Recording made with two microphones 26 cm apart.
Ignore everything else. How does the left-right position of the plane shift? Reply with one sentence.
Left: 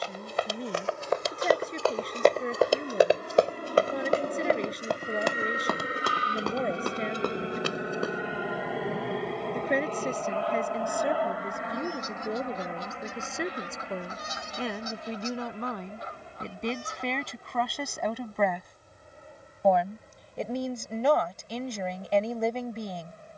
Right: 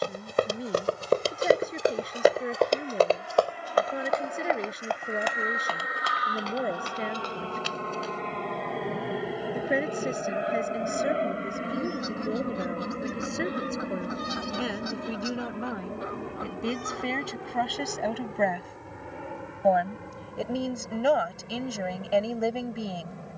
In this clip you hear the plane travel towards the right.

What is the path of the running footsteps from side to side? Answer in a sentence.
You can hear the running footsteps move to the left.